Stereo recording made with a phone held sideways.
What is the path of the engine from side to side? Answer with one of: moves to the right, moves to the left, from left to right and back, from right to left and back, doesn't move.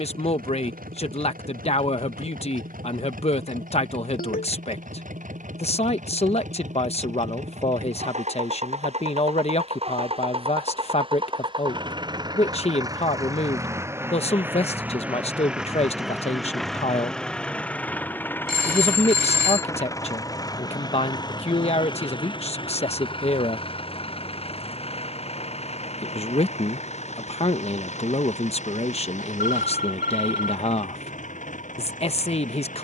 moves to the left.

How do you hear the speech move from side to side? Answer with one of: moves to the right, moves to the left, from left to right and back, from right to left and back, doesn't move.
doesn't move.